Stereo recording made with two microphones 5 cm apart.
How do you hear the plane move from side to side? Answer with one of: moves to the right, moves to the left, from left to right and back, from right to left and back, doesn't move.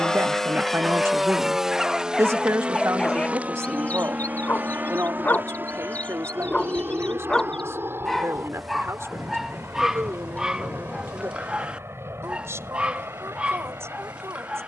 moves to the right.